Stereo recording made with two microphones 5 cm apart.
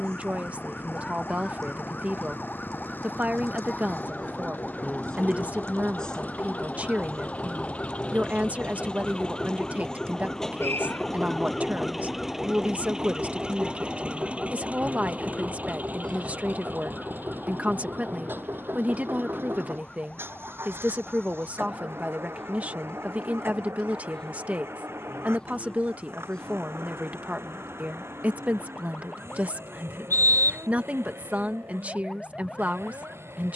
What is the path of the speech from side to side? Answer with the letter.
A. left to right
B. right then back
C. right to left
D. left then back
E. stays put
E.